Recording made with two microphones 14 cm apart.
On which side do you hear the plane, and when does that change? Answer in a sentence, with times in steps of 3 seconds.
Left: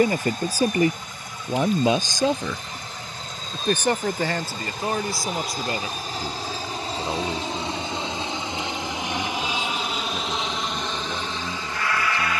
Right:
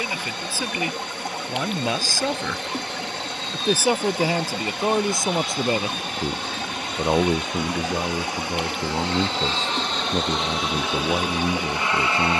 In this clip you hear the plane on the left from 0 s and in the centre from 9 s.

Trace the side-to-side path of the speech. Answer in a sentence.
In this clip you hear the speech move to the right.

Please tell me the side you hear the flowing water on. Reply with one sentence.
You can hear the flowing water on the right.